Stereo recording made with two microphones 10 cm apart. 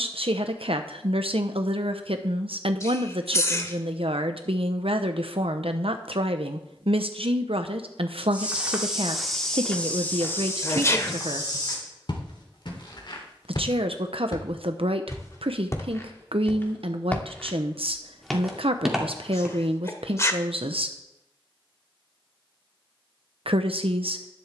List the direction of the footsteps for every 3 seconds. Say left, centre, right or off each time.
off, off, centre, left, left, left, centre, off.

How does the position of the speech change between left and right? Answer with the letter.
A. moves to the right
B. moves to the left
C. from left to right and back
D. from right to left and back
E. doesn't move
E.